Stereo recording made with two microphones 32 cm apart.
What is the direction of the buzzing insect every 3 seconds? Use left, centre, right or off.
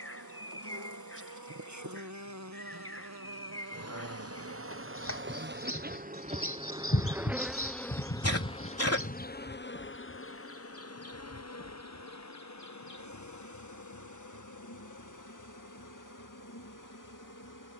right, right, centre, left, left, left.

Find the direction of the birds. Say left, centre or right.
left.